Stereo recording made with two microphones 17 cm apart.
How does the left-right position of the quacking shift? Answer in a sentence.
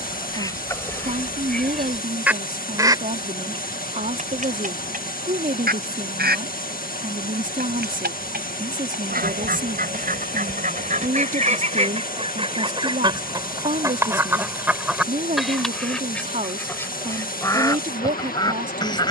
In this clip you hear the quacking move from left to right and back again.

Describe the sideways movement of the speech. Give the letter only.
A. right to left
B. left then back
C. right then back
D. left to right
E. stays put
E.